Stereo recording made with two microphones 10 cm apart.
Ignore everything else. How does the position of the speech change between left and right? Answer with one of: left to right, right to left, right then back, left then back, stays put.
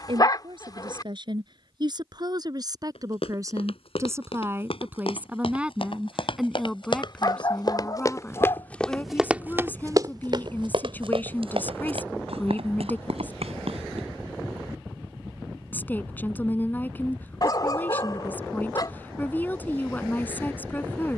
right to left.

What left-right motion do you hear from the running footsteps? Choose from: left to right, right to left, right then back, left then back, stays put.
left to right.